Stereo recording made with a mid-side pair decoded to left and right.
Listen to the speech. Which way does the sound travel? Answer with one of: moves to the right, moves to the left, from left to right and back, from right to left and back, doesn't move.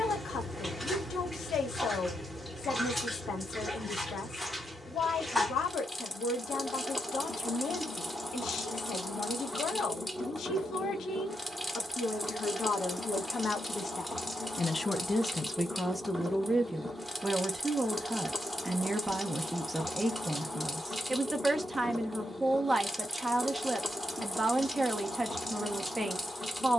moves to the right.